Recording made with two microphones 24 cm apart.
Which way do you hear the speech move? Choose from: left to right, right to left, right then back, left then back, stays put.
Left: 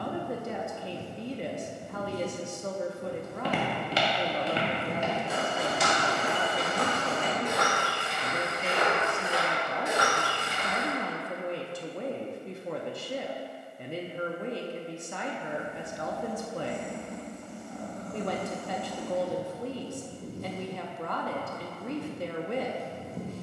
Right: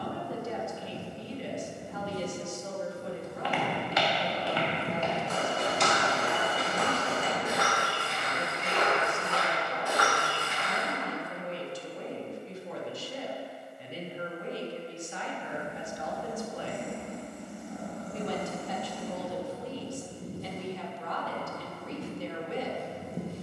stays put.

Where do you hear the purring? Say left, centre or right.
centre.